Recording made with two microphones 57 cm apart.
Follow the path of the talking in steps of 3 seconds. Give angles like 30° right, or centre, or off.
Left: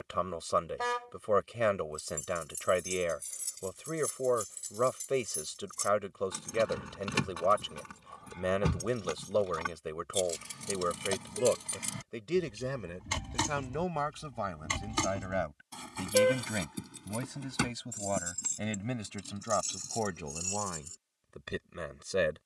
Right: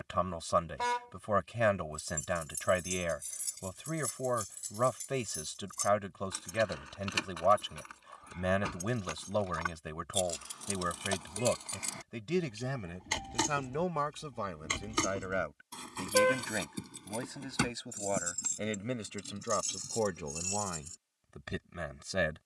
20° right, 20° right, 20° right, 20° right, centre, 20° left, 10° left, 10° right.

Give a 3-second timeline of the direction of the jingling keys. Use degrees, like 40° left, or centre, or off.
10° right, 20° left, 60° left, 50° left, 30° left, 10° left, 10° right, off.